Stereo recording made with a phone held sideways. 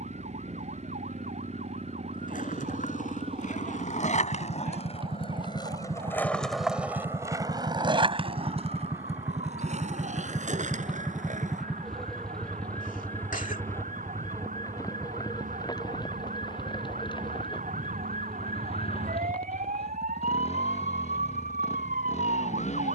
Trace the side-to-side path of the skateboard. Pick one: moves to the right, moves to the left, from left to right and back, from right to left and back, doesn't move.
moves to the right.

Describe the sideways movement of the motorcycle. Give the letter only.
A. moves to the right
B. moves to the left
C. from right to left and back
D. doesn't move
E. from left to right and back
B.